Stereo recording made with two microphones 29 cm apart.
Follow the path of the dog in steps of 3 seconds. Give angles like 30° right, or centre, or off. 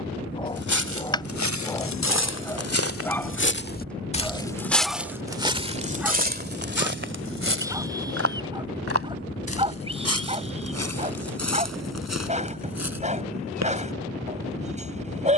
10° left, centre, 10° right, 20° right, 20° right.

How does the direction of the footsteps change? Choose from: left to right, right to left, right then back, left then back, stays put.
left to right.